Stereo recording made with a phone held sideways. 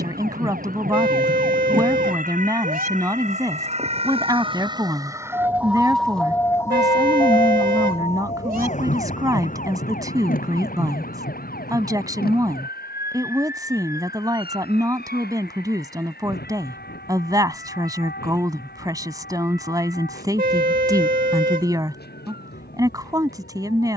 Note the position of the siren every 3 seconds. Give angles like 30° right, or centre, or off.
60° right, 30° right, 30° left, 60° left, 70° left, 80° left, 80° left, 80° left.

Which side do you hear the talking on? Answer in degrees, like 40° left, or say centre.
20° right.